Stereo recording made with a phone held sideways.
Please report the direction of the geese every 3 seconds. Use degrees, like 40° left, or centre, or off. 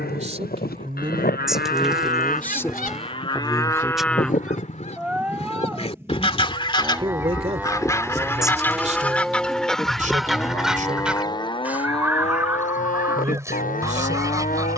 70° left, 50° left, 20° left, centre, 20° right.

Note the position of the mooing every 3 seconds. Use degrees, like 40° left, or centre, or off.
70° left, 10° left, 10° right, 20° left, 60° left.